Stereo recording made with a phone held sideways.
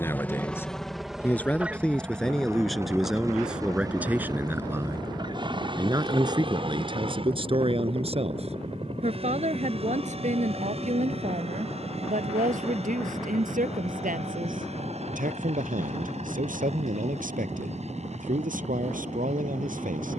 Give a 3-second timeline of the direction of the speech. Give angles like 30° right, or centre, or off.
10° left, 10° right, 40° right, 60° right, 70° right, 70° right, 70° right.